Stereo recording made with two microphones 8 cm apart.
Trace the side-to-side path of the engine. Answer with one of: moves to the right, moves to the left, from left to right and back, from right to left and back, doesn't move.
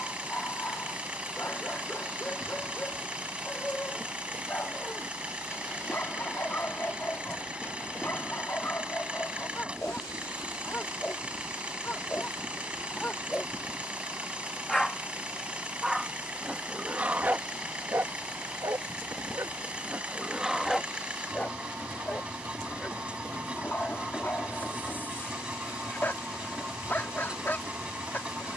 doesn't move.